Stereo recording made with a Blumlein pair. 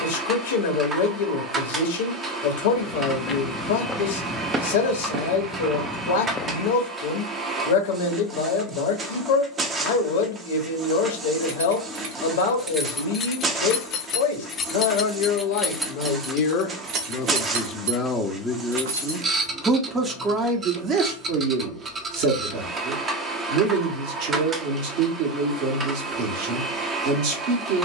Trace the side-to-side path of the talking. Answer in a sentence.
In this clip you hear the talking travel towards the right.